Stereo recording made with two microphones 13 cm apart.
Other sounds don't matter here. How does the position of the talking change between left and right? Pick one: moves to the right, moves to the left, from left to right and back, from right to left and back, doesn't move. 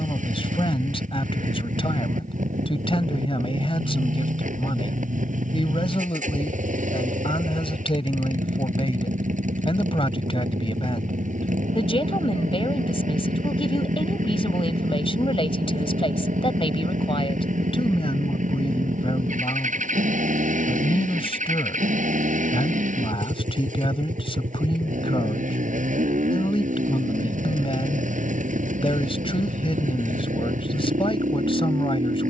doesn't move.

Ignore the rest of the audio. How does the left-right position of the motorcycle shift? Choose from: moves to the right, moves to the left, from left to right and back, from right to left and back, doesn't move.
doesn't move.